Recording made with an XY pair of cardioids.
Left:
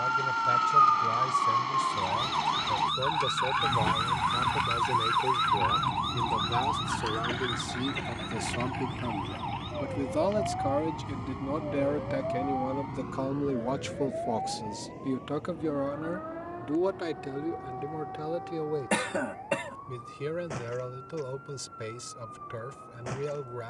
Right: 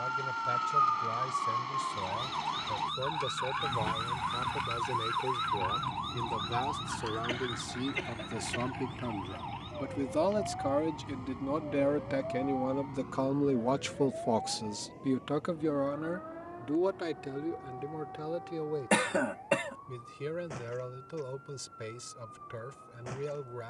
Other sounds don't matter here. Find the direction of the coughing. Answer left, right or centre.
centre.